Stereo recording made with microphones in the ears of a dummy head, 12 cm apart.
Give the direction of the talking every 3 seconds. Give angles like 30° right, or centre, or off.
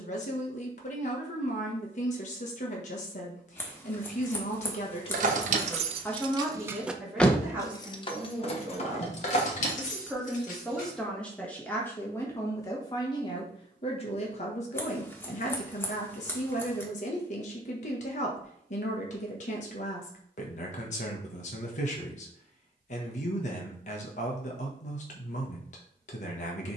50° left, 40° left, 10° right, 10° left, 40° left, 50° left, 50° left, 50° left, 50° left.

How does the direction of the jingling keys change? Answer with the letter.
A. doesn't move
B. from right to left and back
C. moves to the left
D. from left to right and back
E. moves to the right
C.